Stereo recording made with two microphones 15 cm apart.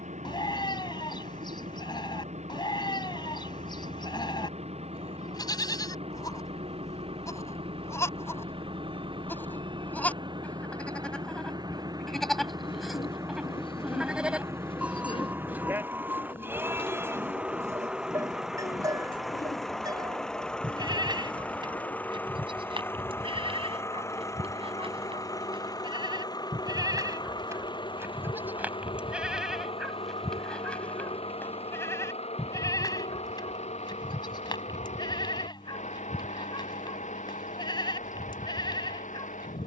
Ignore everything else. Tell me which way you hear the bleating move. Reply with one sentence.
You can hear the bleating go right and come back.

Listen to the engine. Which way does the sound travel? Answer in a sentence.
You can hear the engine go from the right side to the left.